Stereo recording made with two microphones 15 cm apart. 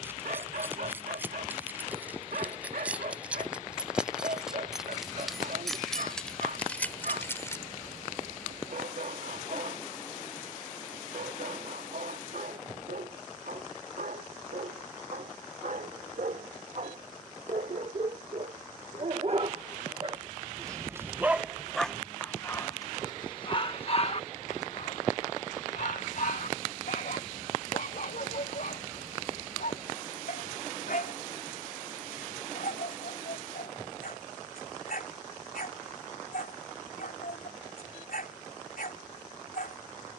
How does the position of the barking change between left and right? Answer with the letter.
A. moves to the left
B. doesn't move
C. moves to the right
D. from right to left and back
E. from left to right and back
A.